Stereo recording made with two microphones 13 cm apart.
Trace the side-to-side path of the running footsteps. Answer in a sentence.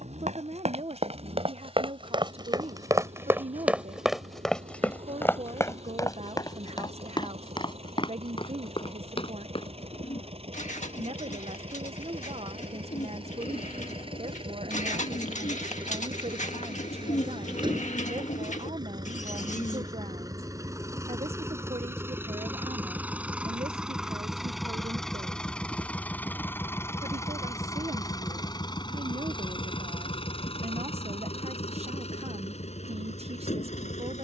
You can hear the running footsteps go from the right side to the left.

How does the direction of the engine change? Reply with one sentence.
In this clip you hear the engine go from the right side to the left.